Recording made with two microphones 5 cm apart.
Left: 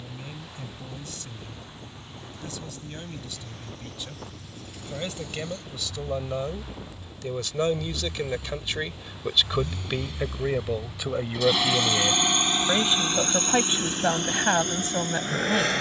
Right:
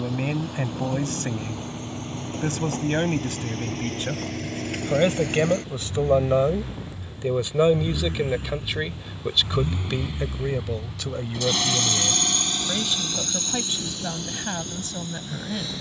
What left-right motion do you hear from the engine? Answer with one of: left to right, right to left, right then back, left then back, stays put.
right to left.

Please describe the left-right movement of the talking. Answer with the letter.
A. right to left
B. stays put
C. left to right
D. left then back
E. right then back
A.